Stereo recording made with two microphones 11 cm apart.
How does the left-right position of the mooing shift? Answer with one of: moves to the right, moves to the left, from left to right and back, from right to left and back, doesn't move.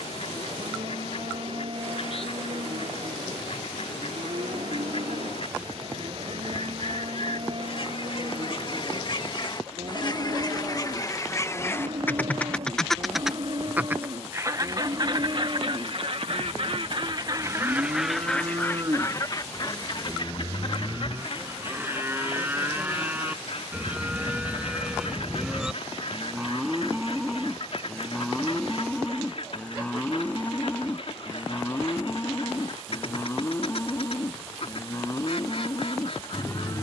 moves to the left.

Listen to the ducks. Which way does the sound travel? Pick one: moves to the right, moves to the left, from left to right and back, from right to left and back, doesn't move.
from left to right and back.